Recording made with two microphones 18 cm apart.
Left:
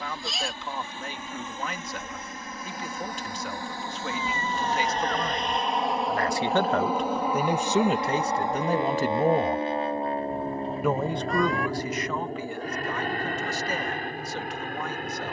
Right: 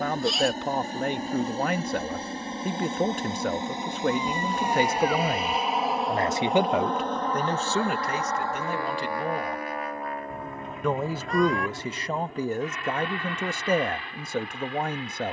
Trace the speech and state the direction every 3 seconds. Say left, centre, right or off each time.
right, right, centre, centre, right.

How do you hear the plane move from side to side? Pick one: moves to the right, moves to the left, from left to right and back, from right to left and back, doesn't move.
moves to the left.